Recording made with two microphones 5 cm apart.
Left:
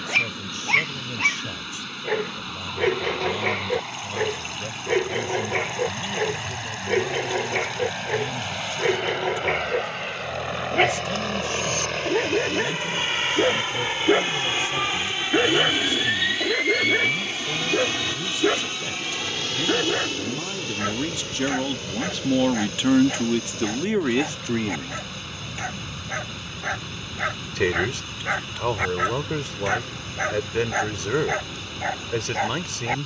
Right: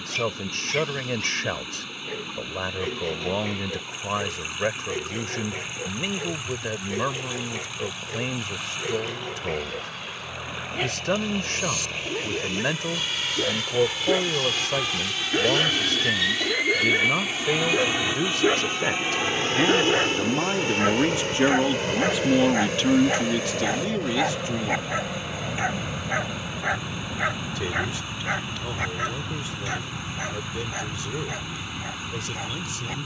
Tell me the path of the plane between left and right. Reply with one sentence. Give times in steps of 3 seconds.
In this clip you hear the plane on the left from 0 s, in the centre from 15 s and on the right from 18 s.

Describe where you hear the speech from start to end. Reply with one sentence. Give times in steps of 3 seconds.
In this clip you hear the speech on the right from 0 s, in the centre from 21 s and on the left from 24 s.